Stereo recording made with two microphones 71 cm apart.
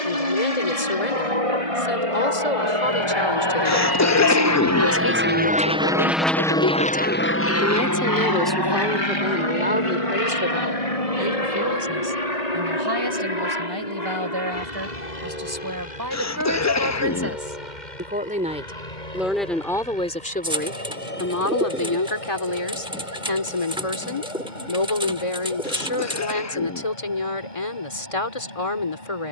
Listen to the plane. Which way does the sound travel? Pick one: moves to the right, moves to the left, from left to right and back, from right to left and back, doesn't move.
moves to the left.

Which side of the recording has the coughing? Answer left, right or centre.
left.